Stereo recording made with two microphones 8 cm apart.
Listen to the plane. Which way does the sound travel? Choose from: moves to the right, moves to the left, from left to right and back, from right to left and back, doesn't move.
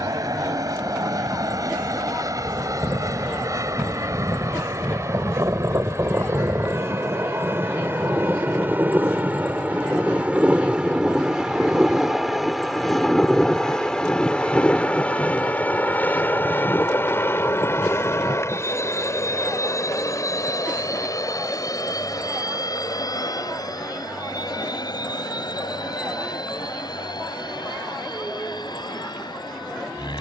moves to the left.